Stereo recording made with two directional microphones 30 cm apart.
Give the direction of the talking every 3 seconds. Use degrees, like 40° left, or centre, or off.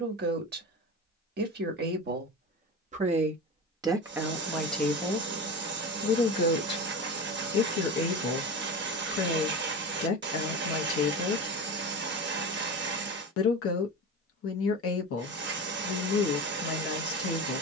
30° right, 10° right, 40° left, 50° left, 50° left, 50° left.